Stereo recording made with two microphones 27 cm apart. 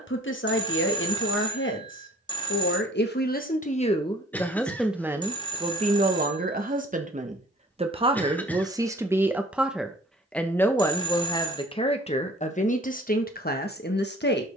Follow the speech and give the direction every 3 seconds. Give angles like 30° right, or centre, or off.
50° left, 10° left, 20° right, 10° left, 30° left.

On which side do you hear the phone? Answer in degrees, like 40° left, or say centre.
20° left.